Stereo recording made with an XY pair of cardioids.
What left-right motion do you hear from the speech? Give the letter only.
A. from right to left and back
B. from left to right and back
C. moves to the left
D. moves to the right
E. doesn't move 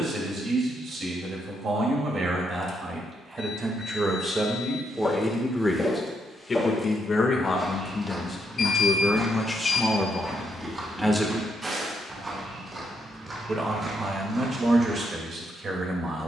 A.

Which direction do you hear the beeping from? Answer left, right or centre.
left.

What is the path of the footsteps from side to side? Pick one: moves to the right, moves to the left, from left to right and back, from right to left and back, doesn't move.
moves to the right.